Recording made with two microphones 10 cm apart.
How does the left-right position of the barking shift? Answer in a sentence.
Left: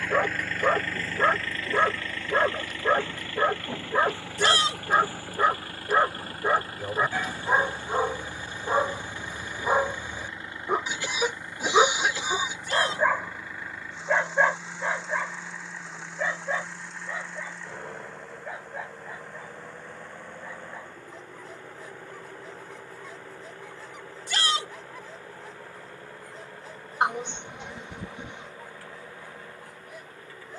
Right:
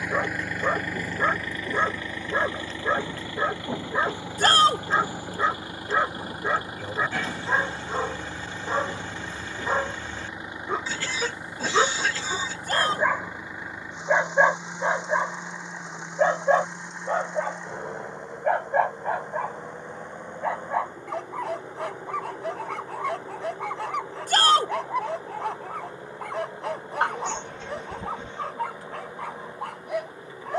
You can hear the barking move to the right.